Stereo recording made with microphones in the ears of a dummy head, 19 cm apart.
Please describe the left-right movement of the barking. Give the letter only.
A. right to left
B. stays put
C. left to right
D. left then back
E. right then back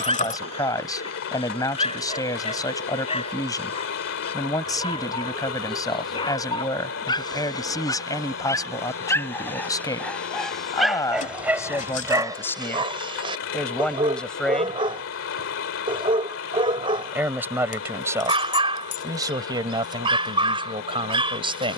C.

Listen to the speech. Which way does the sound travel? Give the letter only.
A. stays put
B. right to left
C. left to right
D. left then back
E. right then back
C.